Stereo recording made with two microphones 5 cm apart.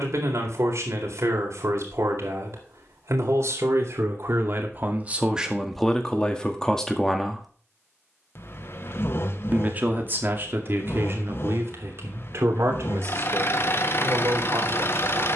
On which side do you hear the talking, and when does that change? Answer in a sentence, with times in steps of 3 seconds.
In this clip you hear the talking on the right from 0 s, in the centre from 6 s and on the right from 9 s.